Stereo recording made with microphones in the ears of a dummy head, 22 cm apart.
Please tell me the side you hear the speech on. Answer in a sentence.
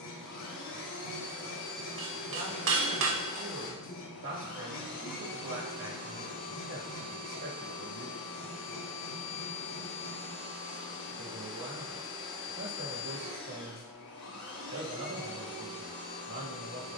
You can hear the speech on the right.